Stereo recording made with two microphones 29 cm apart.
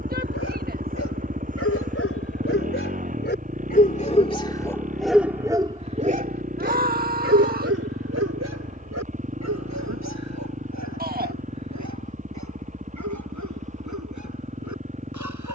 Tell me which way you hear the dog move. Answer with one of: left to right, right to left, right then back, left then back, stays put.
left to right.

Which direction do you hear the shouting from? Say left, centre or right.
right.